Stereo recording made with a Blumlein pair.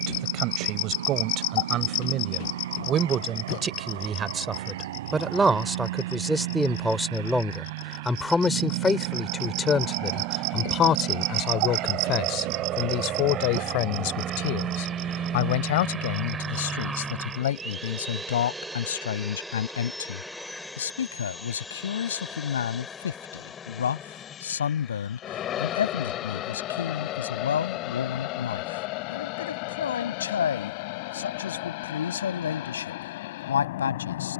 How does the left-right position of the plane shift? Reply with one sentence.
In this clip you hear the plane move from right to left.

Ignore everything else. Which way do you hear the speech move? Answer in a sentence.
In this clip you hear the speech move to the left.